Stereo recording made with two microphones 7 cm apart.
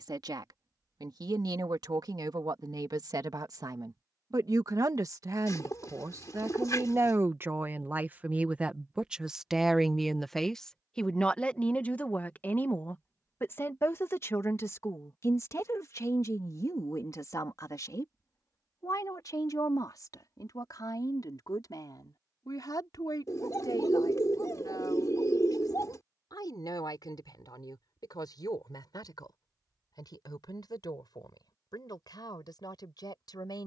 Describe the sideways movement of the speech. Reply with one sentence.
In this clip you hear the speech move from right to left.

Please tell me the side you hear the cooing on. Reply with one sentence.
In this clip you hear the cooing on the left.